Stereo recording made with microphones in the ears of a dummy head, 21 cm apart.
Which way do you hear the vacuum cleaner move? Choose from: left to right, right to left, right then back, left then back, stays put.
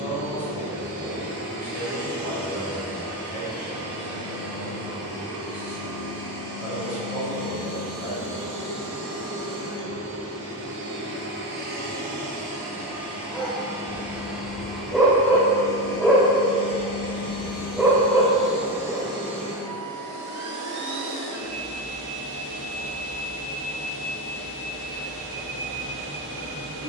left then back.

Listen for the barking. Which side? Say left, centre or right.
centre.